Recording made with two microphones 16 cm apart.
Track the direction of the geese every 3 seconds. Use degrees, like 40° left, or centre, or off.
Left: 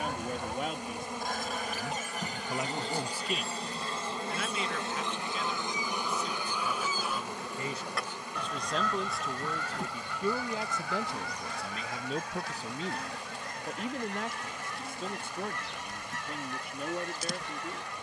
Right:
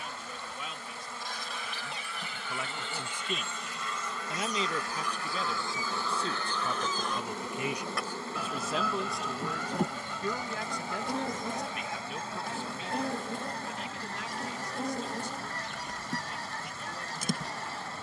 50° left, 30° left, centre, 20° right, 30° right, 40° right.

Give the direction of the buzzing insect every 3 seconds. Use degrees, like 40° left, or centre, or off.
40° left, 20° left, 20° right, 50° right, 60° right, 60° right.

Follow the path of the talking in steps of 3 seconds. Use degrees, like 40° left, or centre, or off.
40° left, 20° right, 20° right, 20° left, 50° left, 60° left.